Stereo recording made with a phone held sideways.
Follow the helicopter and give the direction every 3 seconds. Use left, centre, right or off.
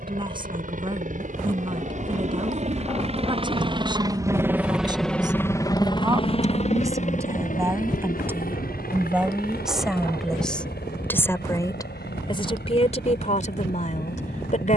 right, centre, left, left, left.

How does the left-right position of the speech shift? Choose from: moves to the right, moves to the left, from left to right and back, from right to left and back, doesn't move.
moves to the left.